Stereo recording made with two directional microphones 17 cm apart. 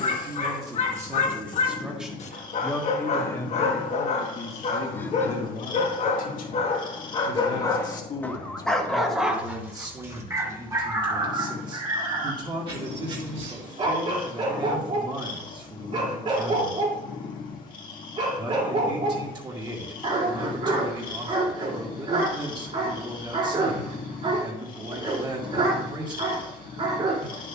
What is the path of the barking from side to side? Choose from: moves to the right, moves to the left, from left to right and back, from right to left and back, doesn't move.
moves to the right.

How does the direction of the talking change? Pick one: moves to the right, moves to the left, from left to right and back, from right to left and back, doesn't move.
from right to left and back.